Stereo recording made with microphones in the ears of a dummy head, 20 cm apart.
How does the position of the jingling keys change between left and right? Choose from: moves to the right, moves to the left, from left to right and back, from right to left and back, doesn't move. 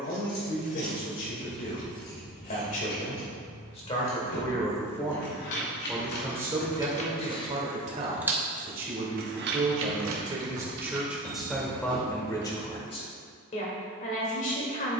moves to the right.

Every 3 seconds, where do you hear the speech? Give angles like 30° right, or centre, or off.
40° left, 20° left, 20° right, 10° right, 30° left.